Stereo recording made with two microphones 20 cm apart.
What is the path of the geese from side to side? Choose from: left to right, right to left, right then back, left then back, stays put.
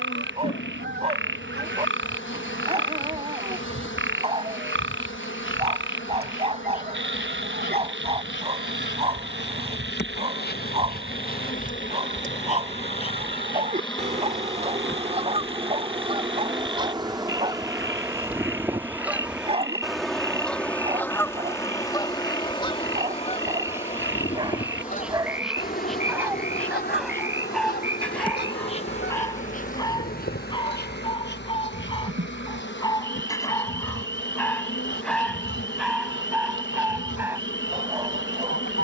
right to left.